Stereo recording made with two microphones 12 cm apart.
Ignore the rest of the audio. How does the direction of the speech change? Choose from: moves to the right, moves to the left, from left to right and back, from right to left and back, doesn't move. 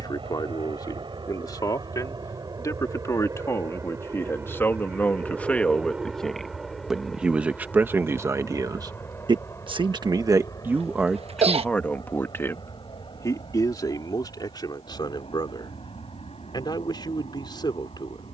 from left to right and back.